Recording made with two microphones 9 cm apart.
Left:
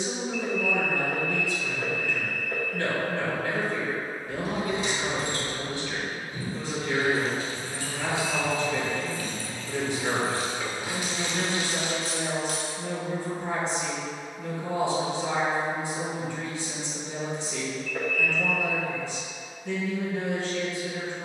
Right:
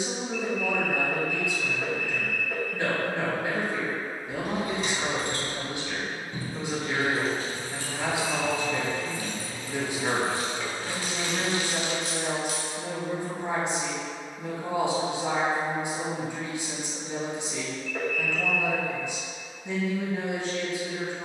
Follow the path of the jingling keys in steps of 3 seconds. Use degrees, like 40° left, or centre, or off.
off, 50° right, 40° right, 10° left, 50° left, off, off.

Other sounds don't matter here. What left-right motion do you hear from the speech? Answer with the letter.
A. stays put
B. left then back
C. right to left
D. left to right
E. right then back
A.